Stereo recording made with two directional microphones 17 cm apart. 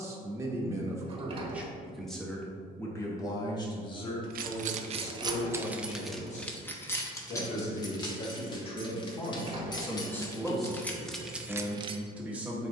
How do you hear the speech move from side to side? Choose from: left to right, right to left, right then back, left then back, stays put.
left then back.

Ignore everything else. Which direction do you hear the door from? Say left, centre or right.
right.